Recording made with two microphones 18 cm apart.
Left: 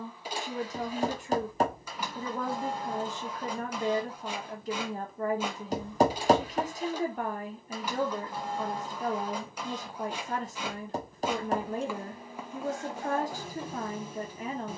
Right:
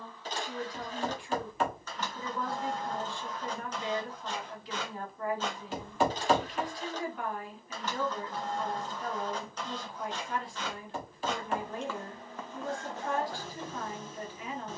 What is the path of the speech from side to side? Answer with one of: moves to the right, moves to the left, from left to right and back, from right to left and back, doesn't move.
doesn't move.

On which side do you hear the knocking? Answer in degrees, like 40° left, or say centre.
40° left.